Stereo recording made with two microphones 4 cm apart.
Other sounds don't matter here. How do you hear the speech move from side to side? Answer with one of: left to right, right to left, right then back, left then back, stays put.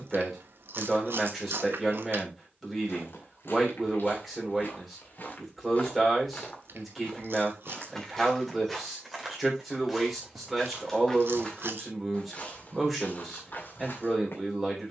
stays put.